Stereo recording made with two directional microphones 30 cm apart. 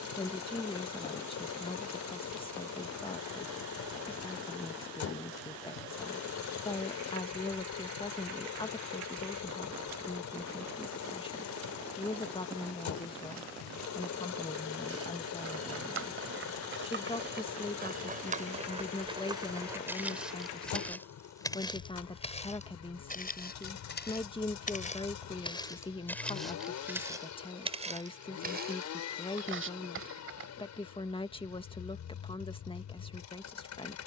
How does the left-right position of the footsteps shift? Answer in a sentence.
In this clip you hear the footsteps move from right to left and back again.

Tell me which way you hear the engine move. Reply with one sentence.
In this clip you hear the engine stay in one place.